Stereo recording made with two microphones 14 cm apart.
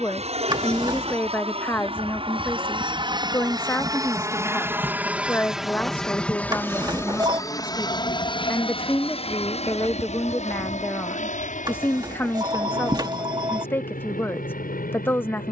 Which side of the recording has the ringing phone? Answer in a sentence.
You can hear the ringing phone on the right.